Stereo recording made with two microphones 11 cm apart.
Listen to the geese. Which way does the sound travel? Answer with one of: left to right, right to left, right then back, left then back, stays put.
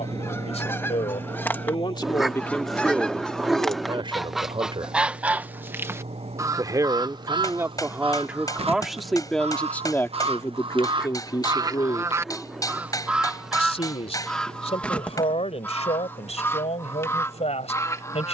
right then back.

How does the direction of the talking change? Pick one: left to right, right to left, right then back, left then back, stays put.
right then back.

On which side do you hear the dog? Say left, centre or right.
centre.